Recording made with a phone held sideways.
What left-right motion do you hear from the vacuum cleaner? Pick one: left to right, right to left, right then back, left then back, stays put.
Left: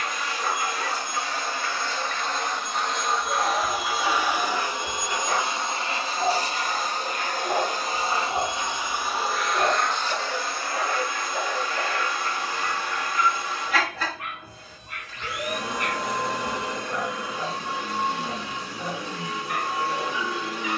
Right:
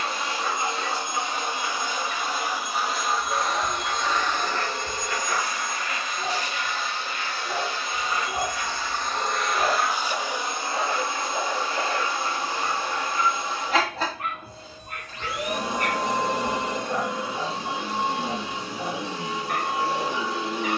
left then back.